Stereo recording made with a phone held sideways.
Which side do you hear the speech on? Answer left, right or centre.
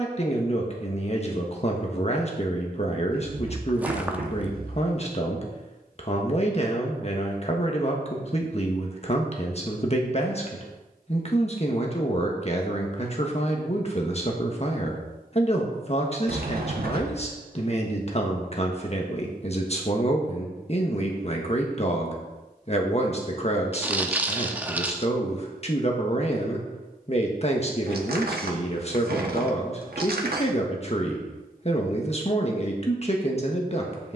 left.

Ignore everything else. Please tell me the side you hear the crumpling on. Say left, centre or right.
centre.